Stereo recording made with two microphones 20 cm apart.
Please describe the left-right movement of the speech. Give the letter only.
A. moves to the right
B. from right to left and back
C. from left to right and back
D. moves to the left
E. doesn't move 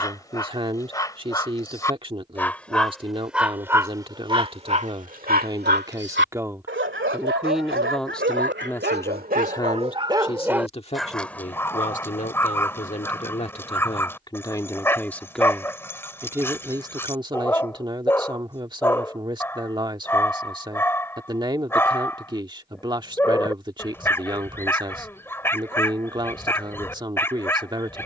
B.